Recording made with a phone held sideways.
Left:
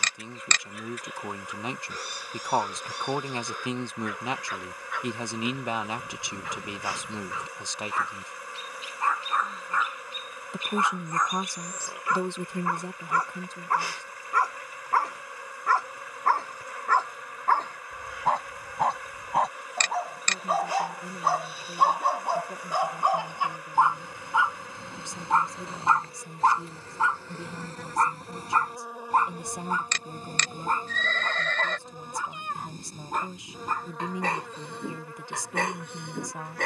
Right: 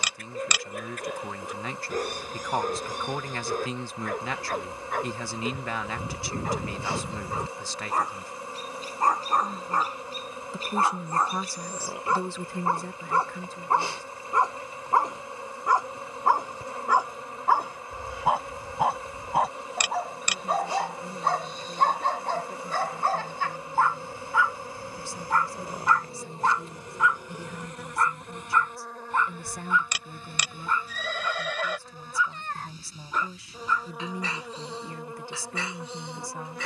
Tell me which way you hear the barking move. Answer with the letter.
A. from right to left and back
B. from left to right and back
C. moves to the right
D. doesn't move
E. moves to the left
E.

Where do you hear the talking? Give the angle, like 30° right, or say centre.
20° left.